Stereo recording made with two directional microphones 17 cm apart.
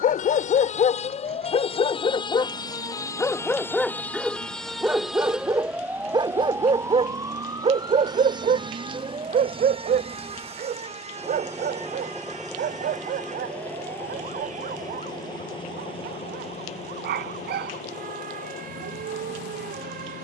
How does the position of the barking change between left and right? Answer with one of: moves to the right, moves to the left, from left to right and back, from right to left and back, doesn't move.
moves to the right.